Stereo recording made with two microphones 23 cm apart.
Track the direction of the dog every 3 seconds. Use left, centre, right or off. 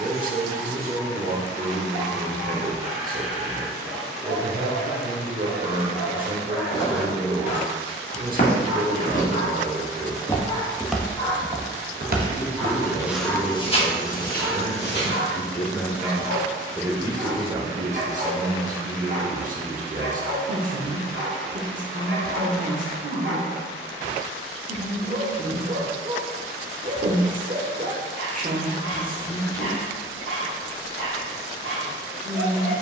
left, left, left, left, centre, right, right, right, right, right, right.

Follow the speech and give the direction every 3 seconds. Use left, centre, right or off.
right, right, right, right, left, centre, right, right, right, right, right.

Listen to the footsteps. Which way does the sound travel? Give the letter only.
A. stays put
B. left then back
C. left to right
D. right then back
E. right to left
D.